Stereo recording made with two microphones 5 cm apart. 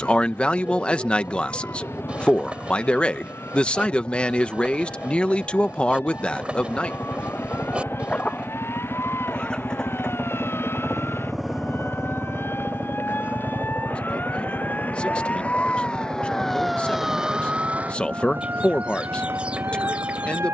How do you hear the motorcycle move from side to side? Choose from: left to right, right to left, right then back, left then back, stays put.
left to right.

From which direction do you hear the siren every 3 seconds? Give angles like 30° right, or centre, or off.
70° left, 70° left, 70° left, 60° left, 50° left, 10° left, 60° right.